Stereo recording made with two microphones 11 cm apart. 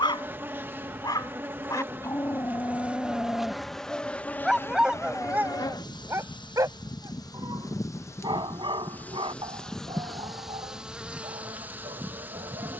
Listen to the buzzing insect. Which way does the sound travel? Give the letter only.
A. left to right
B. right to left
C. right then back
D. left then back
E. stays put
D.